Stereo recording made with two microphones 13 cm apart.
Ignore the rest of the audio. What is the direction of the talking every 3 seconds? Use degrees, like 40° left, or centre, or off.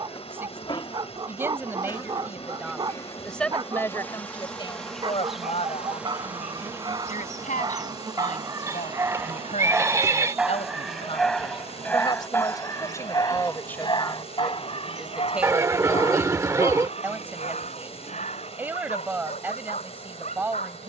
20° right, 30° left, 70° left, 50° left, 20° left, 10° right, 20° right.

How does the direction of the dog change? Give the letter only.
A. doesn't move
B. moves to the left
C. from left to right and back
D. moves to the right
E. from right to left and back
B.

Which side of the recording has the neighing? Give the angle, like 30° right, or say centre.
20° right.